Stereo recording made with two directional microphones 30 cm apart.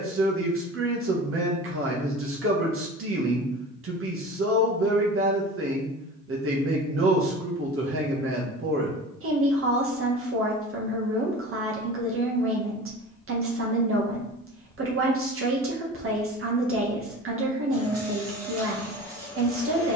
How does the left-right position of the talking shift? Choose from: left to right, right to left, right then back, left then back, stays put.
stays put.